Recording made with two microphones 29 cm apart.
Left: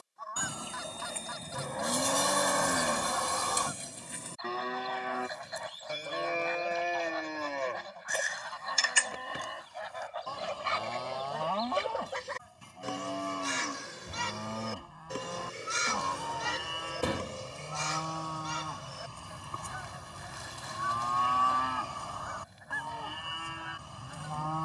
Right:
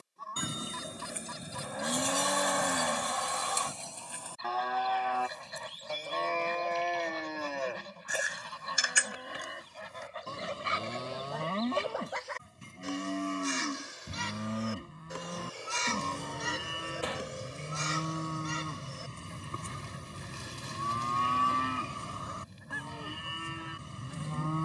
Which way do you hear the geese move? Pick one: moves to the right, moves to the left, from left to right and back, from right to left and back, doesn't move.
from right to left and back.